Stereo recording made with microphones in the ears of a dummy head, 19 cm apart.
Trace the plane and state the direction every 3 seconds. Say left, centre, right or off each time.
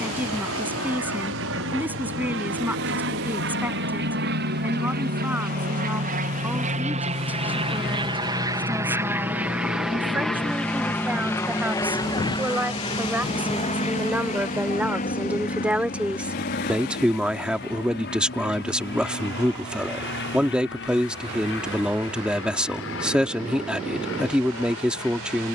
right, right, right, centre, left, left, left, left, left.